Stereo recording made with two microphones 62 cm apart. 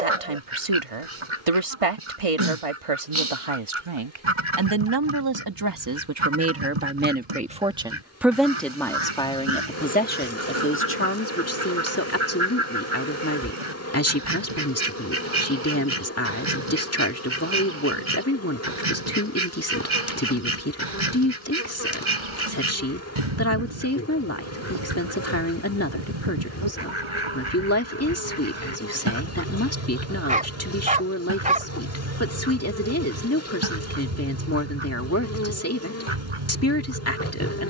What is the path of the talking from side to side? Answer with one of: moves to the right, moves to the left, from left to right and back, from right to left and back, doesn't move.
moves to the left.